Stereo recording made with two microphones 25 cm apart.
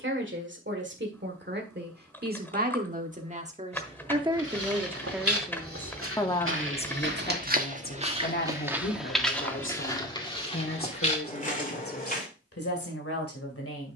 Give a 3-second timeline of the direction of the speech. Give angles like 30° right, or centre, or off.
50° right, 10° right, 40° left, 60° left, 70° left.